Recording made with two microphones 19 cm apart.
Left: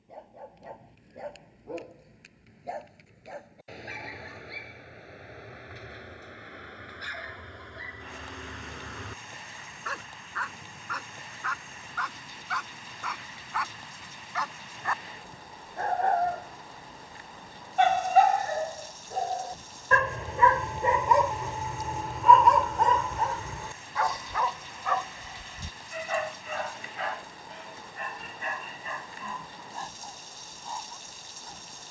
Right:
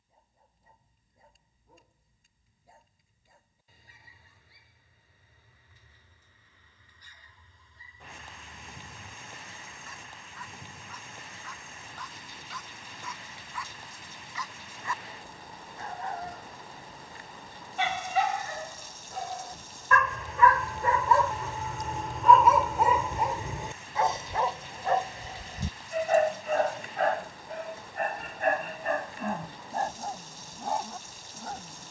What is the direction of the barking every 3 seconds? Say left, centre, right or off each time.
left, left, left, left, left, left, left, centre, right, right, right.